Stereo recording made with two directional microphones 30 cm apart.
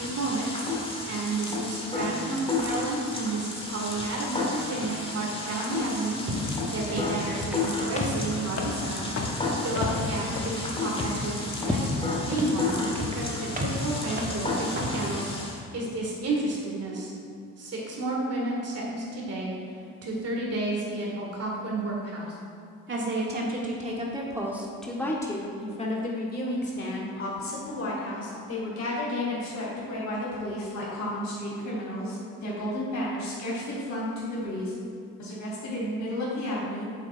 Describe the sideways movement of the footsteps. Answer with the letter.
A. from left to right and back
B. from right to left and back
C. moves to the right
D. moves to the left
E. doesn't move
B.